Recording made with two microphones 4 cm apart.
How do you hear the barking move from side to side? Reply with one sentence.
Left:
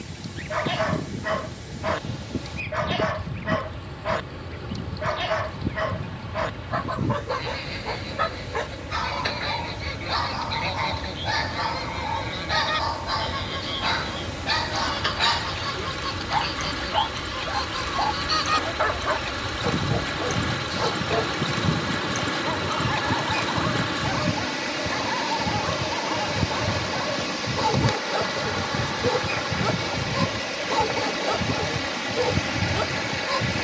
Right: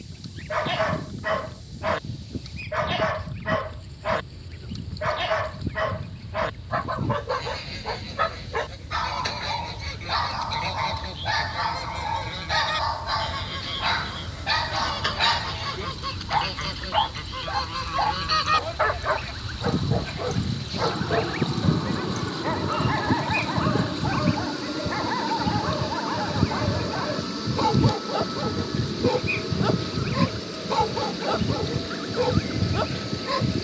You can hear the barking stay put.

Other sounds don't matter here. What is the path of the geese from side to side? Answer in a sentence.
In this clip you hear the geese travel towards the right.